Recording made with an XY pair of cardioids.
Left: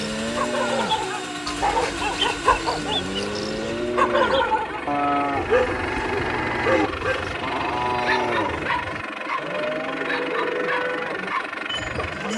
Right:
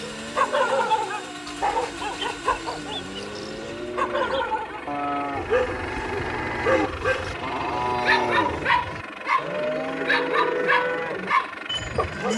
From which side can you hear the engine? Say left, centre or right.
left.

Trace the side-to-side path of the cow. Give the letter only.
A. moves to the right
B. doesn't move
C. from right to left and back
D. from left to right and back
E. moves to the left
A.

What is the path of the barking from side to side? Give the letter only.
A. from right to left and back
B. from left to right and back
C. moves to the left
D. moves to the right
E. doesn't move
A.